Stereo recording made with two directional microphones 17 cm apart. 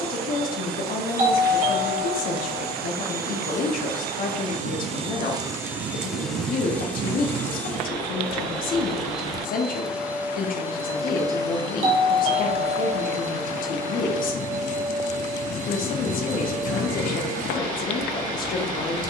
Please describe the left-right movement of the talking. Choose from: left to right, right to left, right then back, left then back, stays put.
stays put.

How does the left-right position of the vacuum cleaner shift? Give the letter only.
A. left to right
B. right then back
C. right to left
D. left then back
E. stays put
D.